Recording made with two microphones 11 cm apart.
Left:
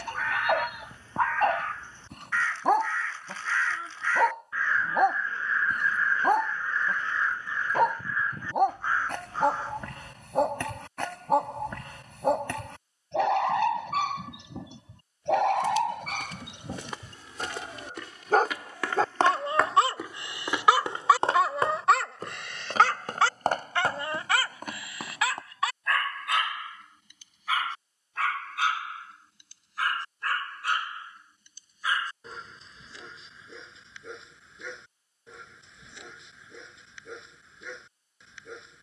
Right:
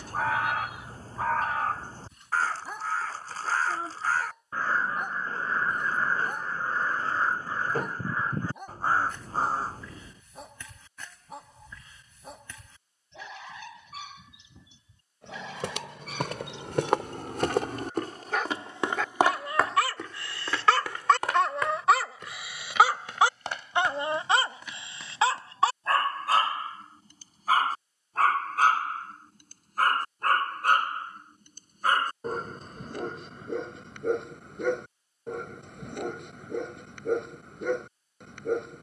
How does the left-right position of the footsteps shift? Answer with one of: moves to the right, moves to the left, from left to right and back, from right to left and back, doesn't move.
moves to the left.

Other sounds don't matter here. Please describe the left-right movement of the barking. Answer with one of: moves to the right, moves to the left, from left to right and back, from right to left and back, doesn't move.
moves to the right.